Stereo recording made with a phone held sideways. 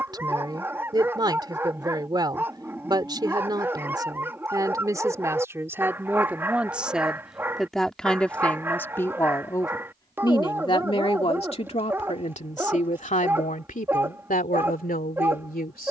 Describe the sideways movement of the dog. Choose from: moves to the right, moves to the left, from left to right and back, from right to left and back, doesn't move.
doesn't move.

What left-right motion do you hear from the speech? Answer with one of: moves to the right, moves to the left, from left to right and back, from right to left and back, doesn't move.
moves to the left.